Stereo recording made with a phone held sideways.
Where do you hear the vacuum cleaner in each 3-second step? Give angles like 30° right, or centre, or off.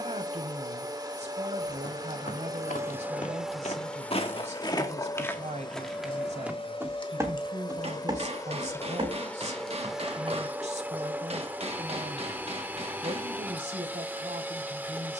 30° right, 20° left, 30° left, 10° right, 10° right.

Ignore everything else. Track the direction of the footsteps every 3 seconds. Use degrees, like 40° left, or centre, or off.
70° left, 30° left, 20° right, 40° right, off.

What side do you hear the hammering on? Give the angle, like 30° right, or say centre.
50° right.